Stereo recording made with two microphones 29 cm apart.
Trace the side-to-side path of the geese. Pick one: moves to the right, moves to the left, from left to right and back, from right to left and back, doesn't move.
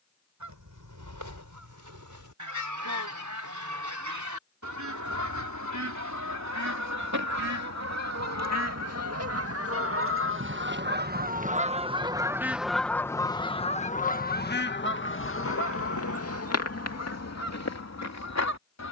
moves to the left.